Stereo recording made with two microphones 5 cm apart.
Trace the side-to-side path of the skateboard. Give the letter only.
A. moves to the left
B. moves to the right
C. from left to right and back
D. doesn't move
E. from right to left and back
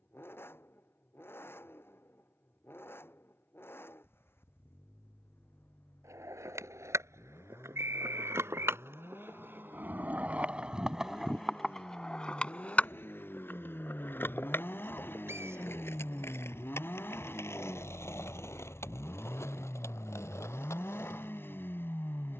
A.